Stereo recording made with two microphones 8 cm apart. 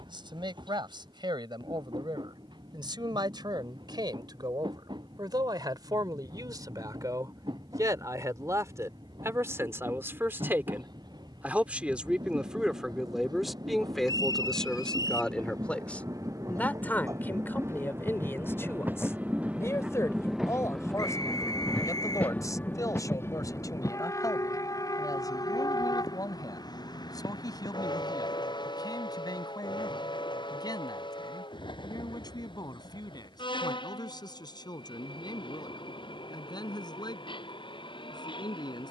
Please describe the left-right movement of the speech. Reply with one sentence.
In this clip you hear the speech move to the left.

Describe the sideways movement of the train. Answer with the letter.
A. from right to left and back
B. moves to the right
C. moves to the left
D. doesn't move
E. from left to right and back
C.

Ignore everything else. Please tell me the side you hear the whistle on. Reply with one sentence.
You can hear the whistle on the left.